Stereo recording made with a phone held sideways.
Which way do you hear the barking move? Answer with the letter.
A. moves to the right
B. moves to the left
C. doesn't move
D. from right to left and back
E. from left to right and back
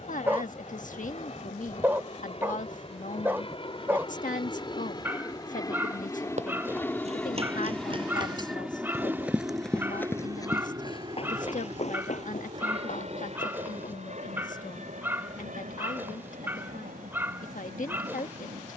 C.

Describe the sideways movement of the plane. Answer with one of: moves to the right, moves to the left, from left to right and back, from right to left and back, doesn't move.
moves to the right.